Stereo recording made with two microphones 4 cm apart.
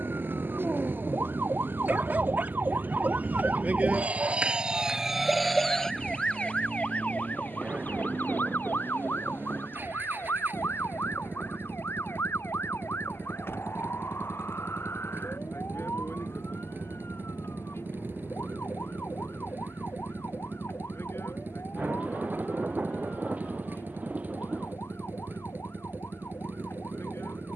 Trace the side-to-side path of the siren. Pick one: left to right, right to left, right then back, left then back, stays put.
right to left.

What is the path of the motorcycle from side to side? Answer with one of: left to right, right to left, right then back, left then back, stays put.
stays put.